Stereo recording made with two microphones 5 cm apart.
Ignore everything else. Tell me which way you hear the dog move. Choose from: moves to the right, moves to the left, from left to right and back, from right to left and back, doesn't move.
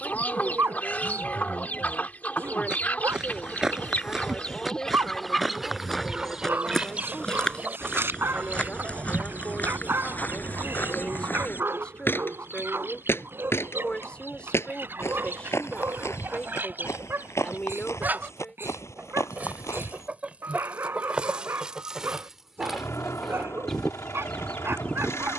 doesn't move.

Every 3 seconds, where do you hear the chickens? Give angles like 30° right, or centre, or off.
30° left, 20° left, 30° right, 40° right, 50° right, 40° right, 30° right, 10° right, 20° left.